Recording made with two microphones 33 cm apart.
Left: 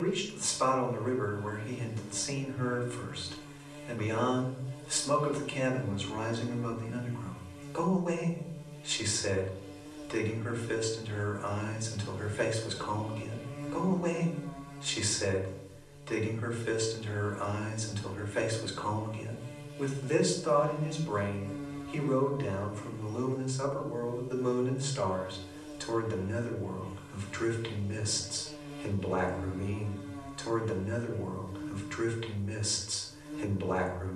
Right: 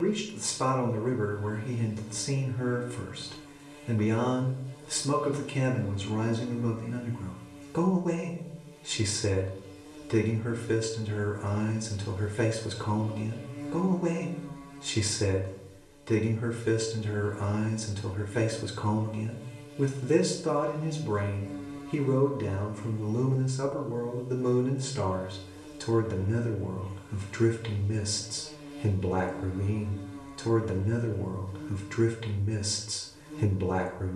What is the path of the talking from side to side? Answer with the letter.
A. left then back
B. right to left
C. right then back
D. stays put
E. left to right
D.